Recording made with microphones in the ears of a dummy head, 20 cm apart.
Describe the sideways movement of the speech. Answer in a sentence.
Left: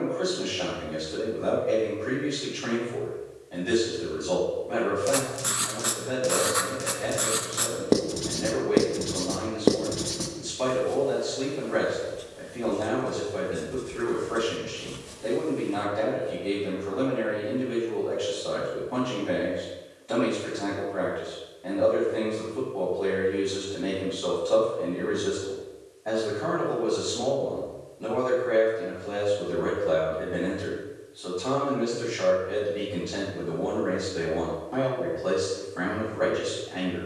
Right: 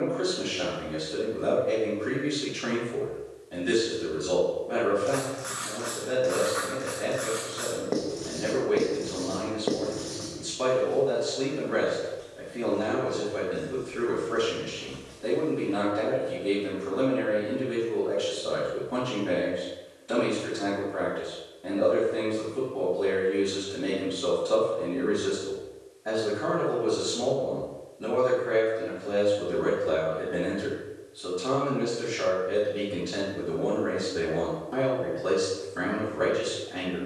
In this clip you hear the speech stay put.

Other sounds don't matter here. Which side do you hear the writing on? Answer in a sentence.
In this clip you hear the writing on the left.